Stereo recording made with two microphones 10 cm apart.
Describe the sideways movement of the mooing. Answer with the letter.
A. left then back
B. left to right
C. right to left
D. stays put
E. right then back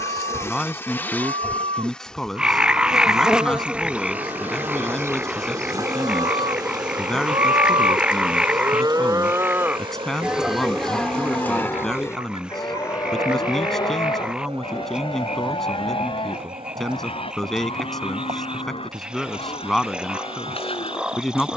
C.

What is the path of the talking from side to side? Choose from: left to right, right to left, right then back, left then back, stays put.
stays put.